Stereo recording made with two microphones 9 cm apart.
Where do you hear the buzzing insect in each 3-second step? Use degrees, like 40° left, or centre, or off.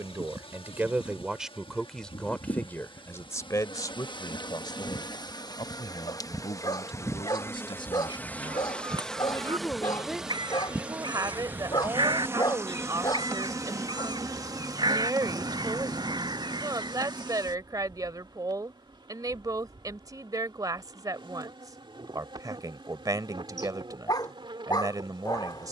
70° left, 50° left, 30° left, 10° right, 30° right, 50° right, 50° right, 60° right, 60° right.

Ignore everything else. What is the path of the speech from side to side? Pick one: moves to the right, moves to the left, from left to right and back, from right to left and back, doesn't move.
from right to left and back.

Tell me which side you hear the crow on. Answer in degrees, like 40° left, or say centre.
50° right.